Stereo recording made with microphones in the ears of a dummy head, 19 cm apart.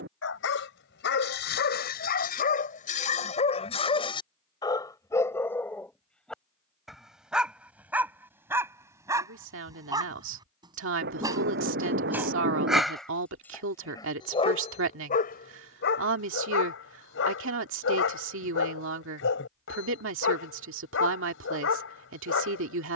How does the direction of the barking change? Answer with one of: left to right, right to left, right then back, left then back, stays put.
right then back.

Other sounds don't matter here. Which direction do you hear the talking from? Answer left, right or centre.
right.